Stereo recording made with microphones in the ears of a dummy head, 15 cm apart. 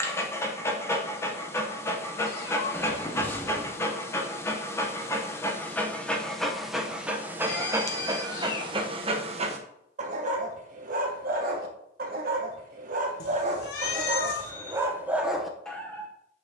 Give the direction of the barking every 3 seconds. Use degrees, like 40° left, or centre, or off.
20° left, 10° left, 10° right, 50° right, 40° right, centre.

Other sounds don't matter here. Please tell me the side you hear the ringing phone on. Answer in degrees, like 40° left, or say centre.
10° left.